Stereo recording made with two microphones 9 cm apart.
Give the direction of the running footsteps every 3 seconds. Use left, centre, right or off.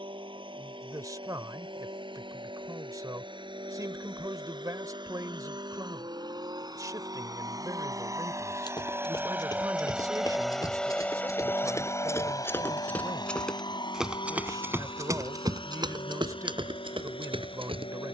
off, off, left, left, centre, right.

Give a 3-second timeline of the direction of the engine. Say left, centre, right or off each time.
right, right, right, centre, left, left.